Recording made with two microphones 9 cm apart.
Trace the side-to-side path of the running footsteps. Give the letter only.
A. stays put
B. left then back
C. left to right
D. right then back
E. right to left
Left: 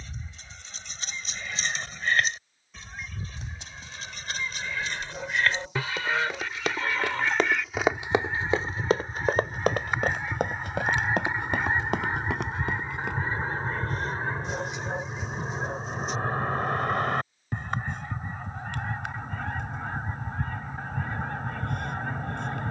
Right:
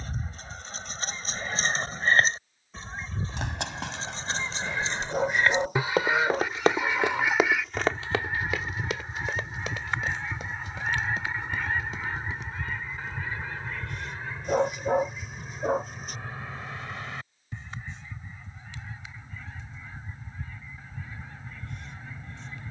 E.